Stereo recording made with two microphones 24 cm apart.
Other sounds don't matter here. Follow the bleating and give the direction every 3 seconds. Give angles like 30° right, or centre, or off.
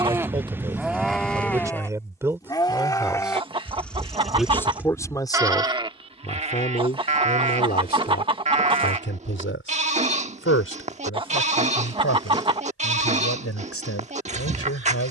centre, centre, 30° right, 30° right, 30° right.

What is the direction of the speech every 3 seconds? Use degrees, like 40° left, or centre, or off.
10° right, 10° left, 40° left, 60° left, 70° left.